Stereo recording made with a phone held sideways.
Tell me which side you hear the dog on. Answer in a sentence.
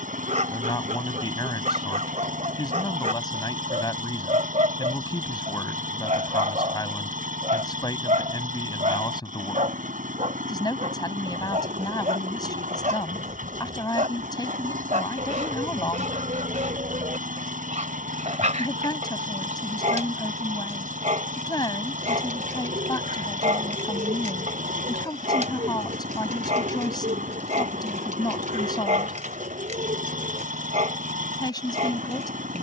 In this clip you hear the dog on the right.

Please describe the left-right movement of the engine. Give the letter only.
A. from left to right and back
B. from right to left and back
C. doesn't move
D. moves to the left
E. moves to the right
C.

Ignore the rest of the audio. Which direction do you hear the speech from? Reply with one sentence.
In this clip you hear the speech on the left.